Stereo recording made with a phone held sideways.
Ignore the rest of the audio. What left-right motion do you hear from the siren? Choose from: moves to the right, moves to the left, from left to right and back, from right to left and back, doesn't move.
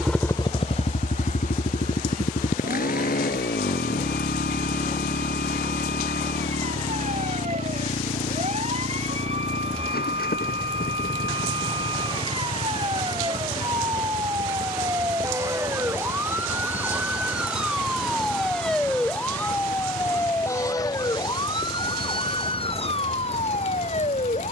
moves to the left.